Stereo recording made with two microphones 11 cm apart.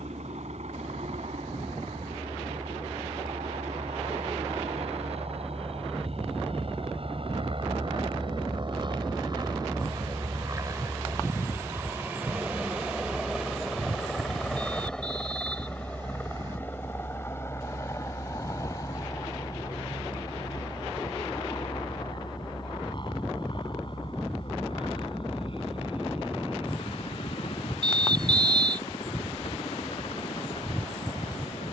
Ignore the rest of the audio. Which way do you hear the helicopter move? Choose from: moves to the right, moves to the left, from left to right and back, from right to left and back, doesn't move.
moves to the left.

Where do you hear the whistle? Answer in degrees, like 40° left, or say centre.
40° right.